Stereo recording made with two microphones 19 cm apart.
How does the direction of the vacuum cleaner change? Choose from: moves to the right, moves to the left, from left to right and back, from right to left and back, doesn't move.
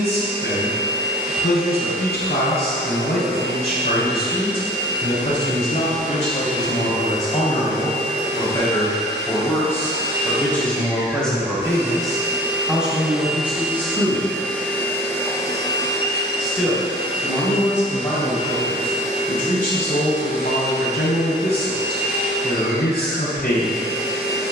moves to the left.